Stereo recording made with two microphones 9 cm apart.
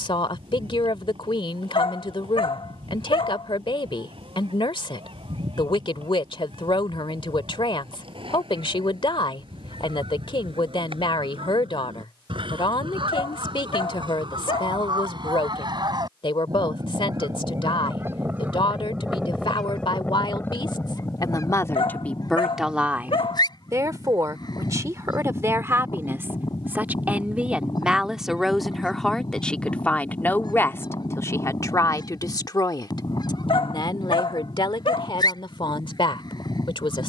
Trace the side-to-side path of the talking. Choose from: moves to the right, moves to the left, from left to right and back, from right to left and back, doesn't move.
from left to right and back.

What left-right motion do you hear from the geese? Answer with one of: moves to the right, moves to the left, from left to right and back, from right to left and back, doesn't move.
moves to the left.